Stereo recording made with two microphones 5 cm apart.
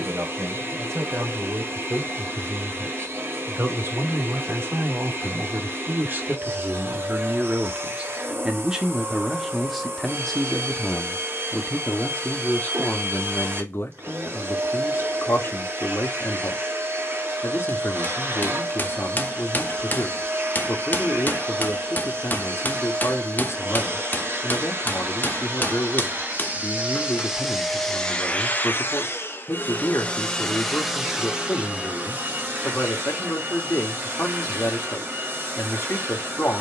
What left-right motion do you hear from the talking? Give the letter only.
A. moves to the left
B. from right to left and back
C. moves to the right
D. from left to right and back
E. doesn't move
A.